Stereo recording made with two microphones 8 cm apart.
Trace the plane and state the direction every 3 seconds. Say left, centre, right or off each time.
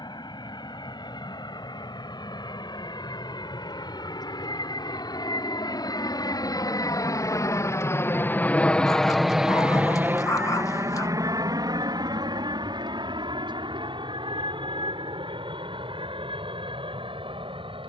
left, left, left, right, right, right.